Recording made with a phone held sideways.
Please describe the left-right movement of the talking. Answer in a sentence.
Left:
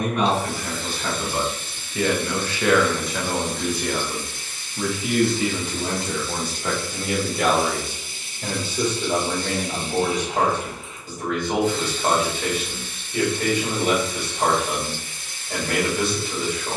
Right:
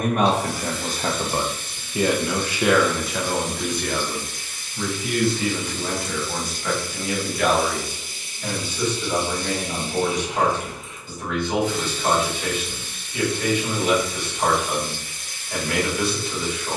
In this clip you hear the talking go from the right side to the left.